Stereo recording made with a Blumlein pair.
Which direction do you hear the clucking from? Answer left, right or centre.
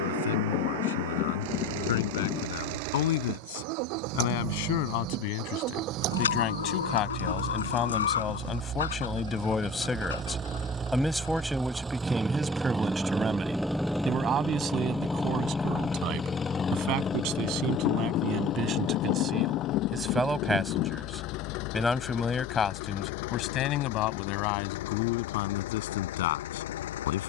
left.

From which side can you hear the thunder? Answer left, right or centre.
left.